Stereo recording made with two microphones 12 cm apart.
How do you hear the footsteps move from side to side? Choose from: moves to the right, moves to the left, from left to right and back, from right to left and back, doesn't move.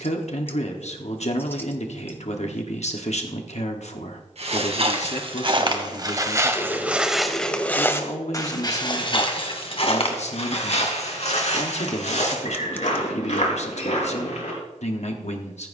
moves to the left.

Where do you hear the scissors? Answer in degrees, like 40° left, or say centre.
20° left.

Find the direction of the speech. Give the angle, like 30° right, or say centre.
60° left.